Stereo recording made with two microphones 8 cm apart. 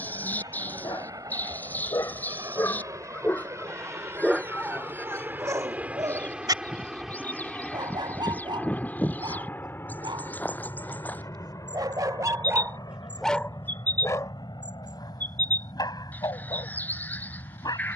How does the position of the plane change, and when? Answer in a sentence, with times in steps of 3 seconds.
In this clip you hear the plane on the right from 0 s, in the centre from 6 s and on the left from 9 s.